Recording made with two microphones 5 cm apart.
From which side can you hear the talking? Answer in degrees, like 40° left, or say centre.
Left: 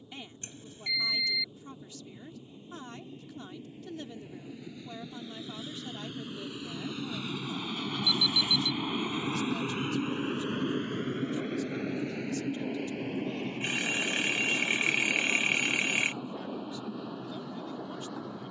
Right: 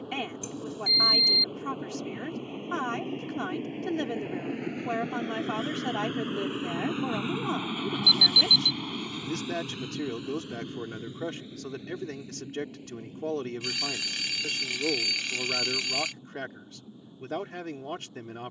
70° right.